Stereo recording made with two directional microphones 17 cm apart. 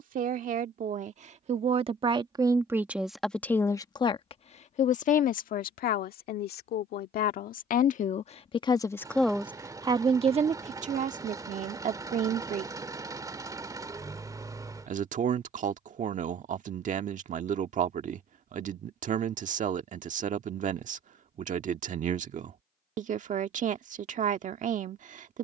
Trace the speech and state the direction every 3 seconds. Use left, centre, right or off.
right, left, left, right, right, right, right, right, right.